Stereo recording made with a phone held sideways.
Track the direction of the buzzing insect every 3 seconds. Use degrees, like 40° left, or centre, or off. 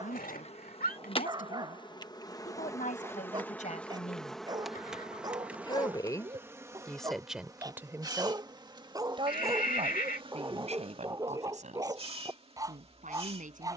40° left, centre, 20° right, 40° right, 40° right.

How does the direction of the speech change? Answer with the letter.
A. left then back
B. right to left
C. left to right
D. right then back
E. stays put
C.